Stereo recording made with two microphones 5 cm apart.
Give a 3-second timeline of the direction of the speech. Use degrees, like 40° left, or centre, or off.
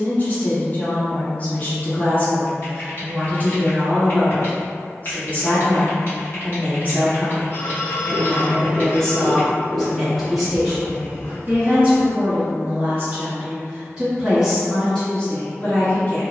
30° left, 30° left, 30° left, 10° right, 20° right, 30° left.